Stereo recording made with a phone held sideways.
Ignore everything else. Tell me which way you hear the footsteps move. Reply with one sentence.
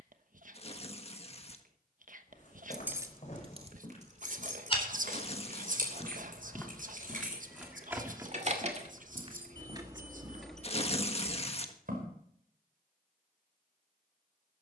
In this clip you hear the footsteps move from left to right.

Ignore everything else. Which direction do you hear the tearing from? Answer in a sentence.
In this clip you hear the tearing on the left.